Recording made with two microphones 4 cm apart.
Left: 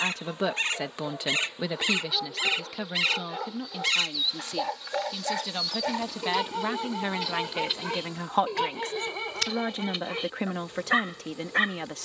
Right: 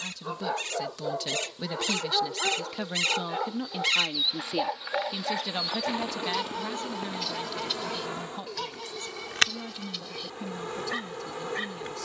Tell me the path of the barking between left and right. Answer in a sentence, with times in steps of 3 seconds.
You can hear the barking on the right from 0 s, in the centre from 3 s and on the left from 6 s.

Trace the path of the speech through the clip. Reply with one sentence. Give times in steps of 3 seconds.
You can hear the speech on the left from 0 s, in the centre from 3 s and on the left from 6 s.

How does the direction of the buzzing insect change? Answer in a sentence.
In this clip you hear the buzzing insect move from left to right.